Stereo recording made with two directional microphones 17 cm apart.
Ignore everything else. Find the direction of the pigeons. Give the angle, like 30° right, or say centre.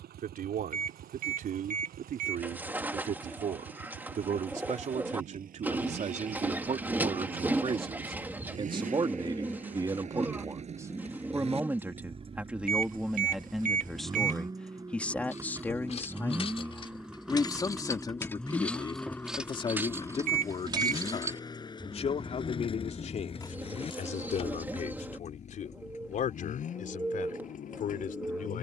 10° right.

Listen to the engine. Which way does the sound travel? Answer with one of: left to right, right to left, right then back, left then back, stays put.
right to left.